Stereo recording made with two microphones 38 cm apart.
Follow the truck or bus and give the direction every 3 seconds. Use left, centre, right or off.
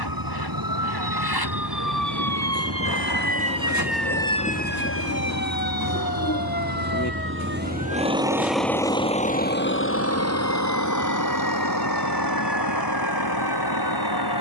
right, right, right, left, left.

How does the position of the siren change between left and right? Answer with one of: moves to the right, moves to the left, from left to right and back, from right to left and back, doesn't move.
moves to the left.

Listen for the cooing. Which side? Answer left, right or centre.
left.